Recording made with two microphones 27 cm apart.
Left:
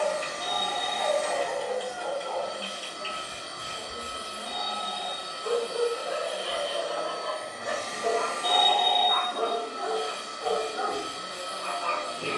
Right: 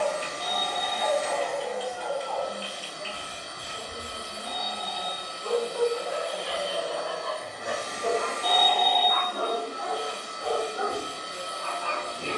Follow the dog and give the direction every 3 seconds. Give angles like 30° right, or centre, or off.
50° left, 20° left, centre, 10° left.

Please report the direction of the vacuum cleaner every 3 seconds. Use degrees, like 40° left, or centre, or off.
centre, 20° left, 10° right, 40° right.